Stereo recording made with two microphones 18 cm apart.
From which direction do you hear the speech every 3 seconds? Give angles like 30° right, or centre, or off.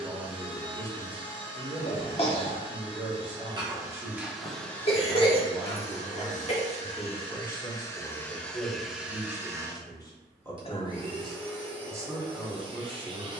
30° right, 30° right, 10° left, 10° left, 30° right.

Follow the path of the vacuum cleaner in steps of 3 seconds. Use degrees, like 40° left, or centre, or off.
30° right, centre, 20° left, 20° right, 30° right.